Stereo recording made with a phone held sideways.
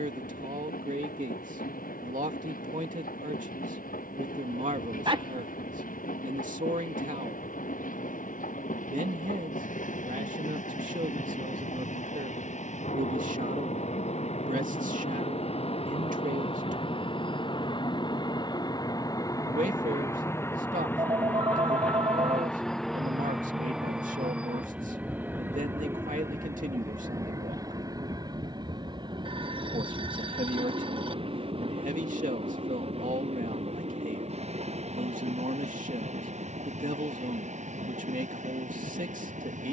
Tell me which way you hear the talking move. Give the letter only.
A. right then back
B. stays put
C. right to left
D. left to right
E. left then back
B.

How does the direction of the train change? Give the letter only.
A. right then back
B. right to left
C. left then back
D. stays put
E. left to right
E.